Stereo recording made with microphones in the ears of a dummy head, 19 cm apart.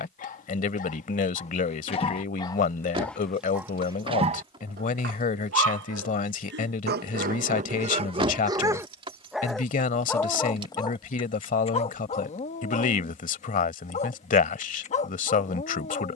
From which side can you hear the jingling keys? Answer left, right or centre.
right.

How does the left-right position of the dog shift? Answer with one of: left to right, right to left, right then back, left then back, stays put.
right then back.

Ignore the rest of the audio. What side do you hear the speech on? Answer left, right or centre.
left.